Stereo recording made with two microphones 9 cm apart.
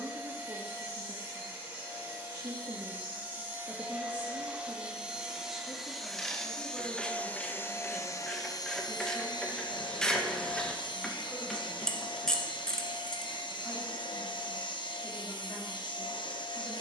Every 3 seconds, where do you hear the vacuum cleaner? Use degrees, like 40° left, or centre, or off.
20° right, 10° right, 20° left, 70° left, 70° left, 70° left.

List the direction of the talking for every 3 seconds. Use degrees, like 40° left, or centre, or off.
60° right, 10° right, 10° left, 20° left, 30° left, 30° left.